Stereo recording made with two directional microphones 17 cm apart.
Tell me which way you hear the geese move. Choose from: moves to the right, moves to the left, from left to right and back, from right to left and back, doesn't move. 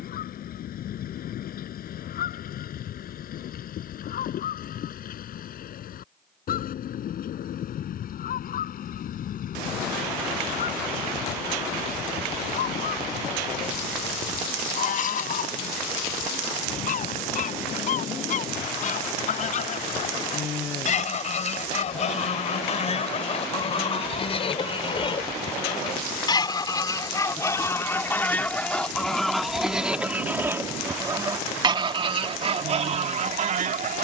moves to the right.